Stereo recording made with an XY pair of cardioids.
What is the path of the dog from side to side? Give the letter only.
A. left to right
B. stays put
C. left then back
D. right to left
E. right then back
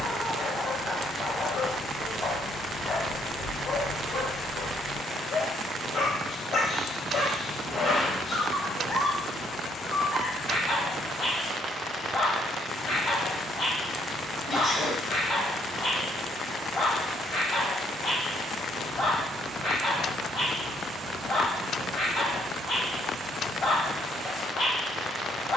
B.